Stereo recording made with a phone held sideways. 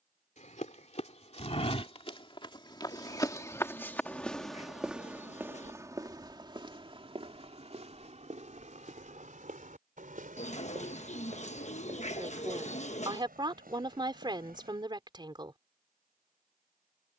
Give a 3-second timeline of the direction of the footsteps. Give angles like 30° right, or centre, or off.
40° left, centre, 40° right, 60° right, 70° right, off.